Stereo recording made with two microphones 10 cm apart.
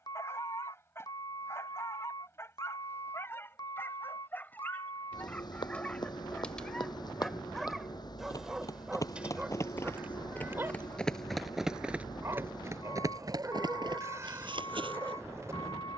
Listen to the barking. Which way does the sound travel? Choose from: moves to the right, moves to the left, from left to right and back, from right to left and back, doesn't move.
moves to the right.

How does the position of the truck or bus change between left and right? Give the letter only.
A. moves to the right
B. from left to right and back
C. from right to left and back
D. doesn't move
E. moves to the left
D.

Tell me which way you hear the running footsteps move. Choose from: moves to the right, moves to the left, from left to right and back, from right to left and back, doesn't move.
moves to the right.